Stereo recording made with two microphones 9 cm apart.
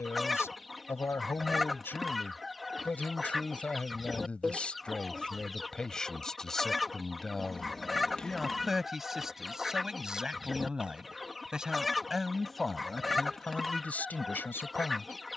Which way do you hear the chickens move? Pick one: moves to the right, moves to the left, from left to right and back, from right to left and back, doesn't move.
doesn't move.